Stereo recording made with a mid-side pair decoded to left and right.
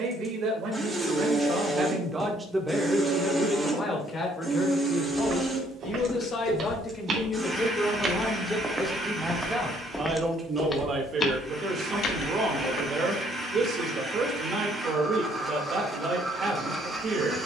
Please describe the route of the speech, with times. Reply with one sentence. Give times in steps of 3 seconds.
You can hear the speech on the right from 0 s, on the left from 3 s and on the right from 9 s.